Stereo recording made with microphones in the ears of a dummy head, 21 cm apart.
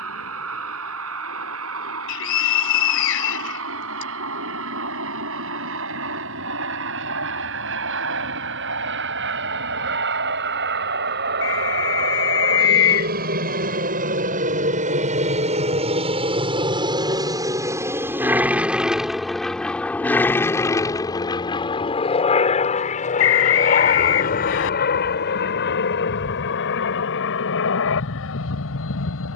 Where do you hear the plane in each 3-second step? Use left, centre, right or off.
right, right, right, right, right, right, centre, left, left, left.